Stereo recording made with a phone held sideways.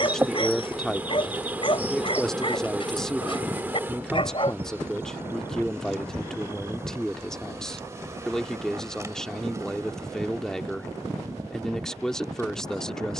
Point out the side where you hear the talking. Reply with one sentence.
You can hear the talking in the centre.